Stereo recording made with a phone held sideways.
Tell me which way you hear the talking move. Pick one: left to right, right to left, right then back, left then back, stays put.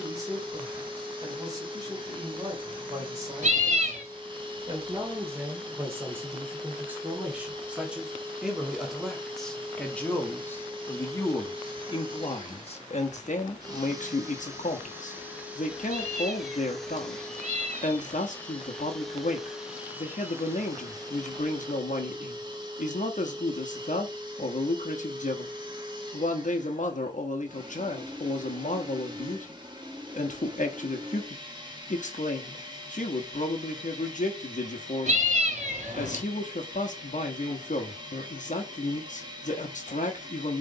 right to left.